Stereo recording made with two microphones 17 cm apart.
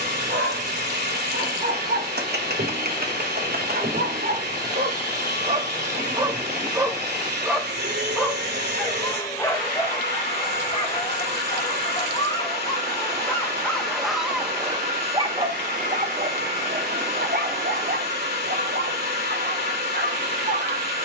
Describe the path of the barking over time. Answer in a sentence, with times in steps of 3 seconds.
In this clip you hear the barking on the right from 0 s, in the centre from 6 s, on the left from 9 s, in the centre from 12 s and on the right from 15 s.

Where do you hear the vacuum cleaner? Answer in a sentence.
In this clip you hear the vacuum cleaner on the right.